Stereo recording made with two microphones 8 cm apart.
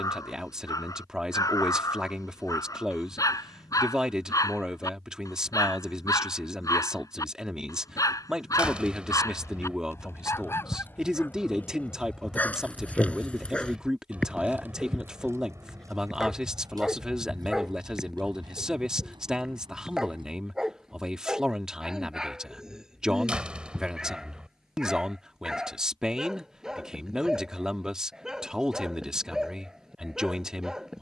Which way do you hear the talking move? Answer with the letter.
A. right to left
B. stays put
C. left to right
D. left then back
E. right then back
B.